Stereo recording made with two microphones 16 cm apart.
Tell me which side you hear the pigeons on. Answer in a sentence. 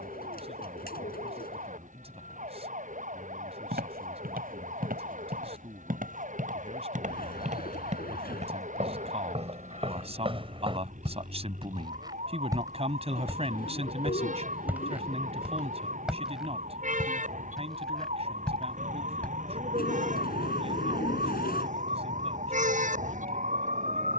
In this clip you hear the pigeons on the left.